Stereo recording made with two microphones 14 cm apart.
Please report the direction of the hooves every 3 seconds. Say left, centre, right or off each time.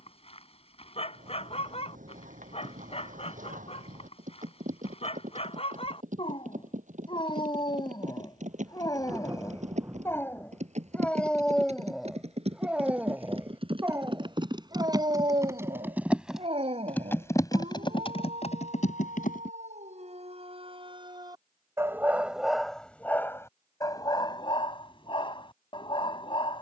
right, right, right, right, right, centre, left, off, off.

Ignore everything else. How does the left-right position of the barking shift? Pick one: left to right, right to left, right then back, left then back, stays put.
right then back.